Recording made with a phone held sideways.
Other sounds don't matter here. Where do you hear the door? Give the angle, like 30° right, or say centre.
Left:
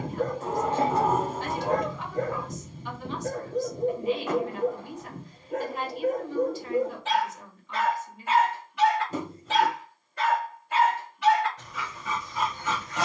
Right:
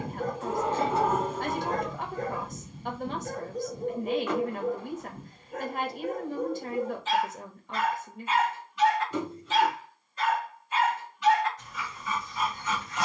50° left.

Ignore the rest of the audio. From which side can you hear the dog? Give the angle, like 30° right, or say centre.
70° left.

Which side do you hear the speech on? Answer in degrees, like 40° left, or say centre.
50° right.